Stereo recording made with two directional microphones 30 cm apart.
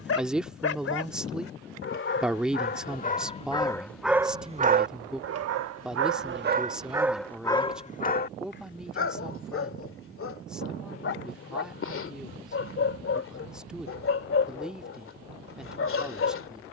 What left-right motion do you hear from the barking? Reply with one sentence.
In this clip you hear the barking go right and come back.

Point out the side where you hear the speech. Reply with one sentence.
You can hear the speech in the centre.